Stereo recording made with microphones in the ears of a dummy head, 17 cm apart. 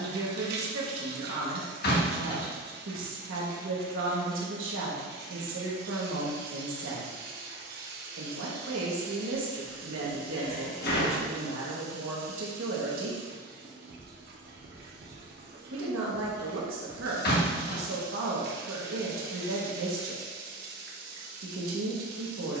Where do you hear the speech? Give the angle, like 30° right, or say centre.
80° right.